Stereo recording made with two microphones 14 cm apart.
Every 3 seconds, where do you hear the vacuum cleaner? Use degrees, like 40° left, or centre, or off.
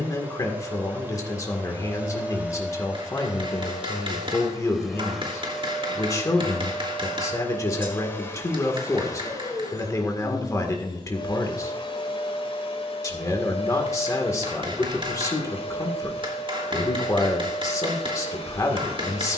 10° right, centre, 10° left, 30° left, 50° left, 50° left, 50° left.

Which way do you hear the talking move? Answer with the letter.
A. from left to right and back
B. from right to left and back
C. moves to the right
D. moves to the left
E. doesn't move
E.